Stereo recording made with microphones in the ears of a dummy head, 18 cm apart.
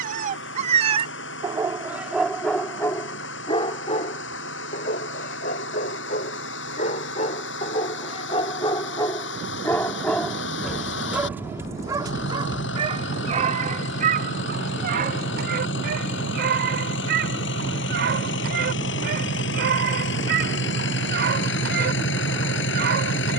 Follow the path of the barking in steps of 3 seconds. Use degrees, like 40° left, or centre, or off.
20° right, 40° left, 30° left, centre, 40° right, 60° right, 60° right, 60° right.